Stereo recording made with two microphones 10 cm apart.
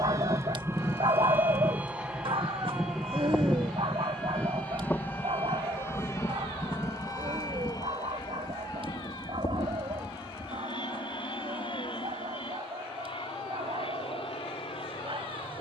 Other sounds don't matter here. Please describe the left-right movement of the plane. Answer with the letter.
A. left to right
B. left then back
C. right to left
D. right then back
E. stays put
C.